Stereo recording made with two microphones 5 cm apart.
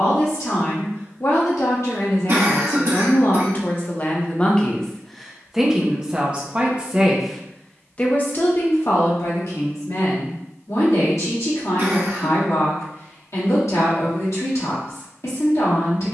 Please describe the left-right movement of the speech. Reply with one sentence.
You can hear the speech go right and come back.